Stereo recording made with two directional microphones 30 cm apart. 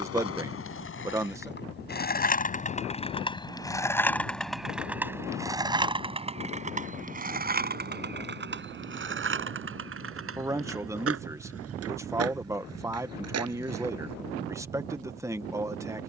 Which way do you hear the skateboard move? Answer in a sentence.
You can hear the skateboard travel towards the right.